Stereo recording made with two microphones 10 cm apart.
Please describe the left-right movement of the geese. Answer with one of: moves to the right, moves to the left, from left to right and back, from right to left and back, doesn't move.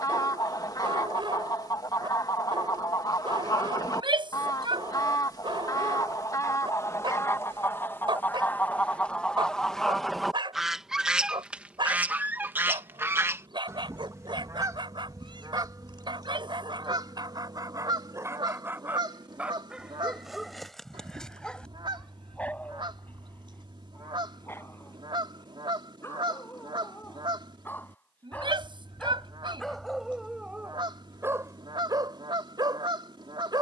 moves to the right.